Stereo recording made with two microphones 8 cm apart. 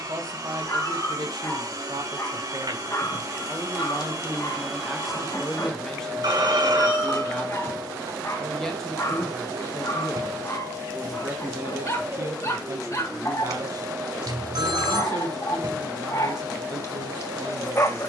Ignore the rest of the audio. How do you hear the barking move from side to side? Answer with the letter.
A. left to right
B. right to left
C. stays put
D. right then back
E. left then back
C.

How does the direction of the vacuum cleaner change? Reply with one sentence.
You can hear the vacuum cleaner stay in one place.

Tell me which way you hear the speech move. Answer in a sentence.
In this clip you hear the speech go left and come back.